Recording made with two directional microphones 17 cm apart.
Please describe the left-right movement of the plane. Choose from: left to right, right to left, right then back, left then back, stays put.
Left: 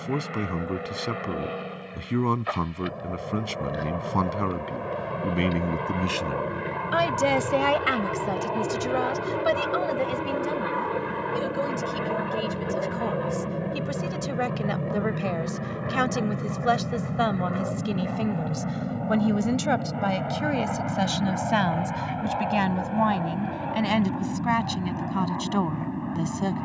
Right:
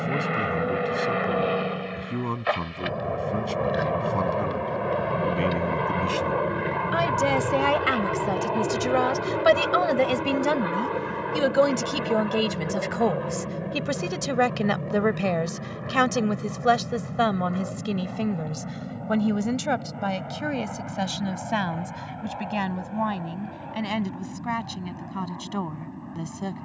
right to left.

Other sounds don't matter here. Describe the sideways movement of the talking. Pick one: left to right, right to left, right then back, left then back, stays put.
right then back.